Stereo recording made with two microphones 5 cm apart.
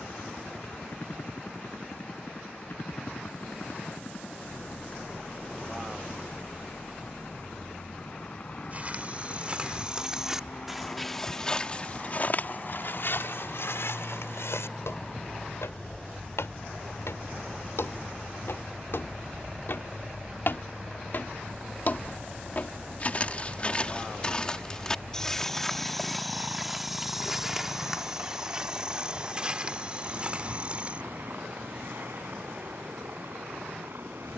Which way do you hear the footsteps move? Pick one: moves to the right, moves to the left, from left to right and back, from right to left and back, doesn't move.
from right to left and back.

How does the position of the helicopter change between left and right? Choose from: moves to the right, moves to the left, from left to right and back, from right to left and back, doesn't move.
moves to the right.